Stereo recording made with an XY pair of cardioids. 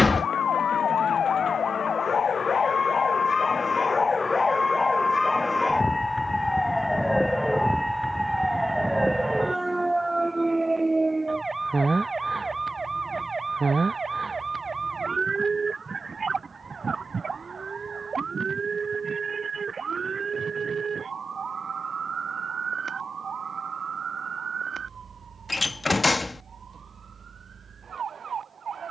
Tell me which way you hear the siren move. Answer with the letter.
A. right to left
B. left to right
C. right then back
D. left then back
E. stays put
B.